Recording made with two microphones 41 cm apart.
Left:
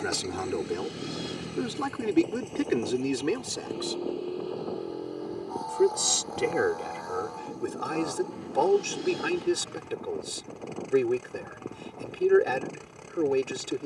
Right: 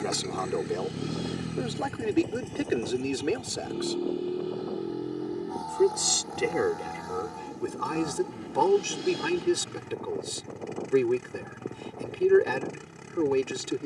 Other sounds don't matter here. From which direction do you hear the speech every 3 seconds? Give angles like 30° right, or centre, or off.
20° left, 10° left, 10° right, 10° right, 10° right.